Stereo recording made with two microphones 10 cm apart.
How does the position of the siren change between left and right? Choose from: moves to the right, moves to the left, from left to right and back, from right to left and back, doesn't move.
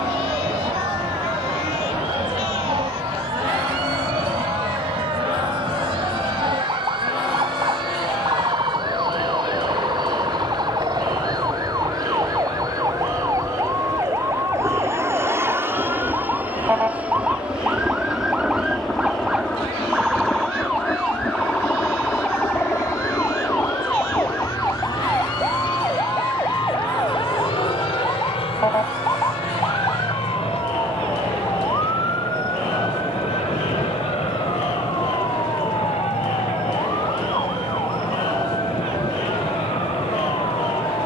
moves to the left.